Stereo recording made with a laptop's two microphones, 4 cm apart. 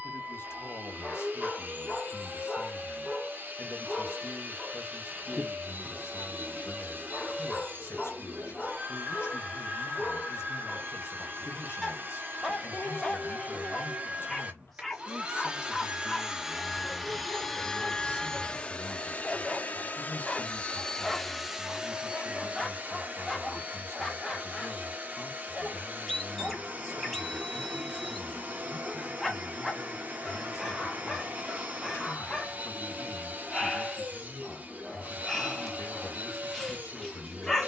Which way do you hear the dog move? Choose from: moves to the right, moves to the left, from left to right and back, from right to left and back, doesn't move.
doesn't move.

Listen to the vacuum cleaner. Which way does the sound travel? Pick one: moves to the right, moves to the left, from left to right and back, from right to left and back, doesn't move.
from right to left and back.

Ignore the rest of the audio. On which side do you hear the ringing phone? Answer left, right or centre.
left.